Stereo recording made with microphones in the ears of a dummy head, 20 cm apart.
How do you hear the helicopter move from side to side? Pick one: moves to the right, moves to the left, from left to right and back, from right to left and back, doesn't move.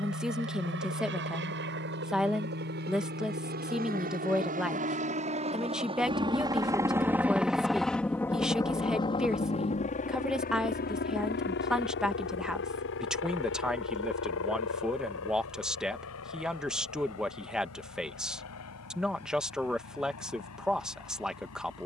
moves to the left.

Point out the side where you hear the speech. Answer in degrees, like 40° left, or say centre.
centre.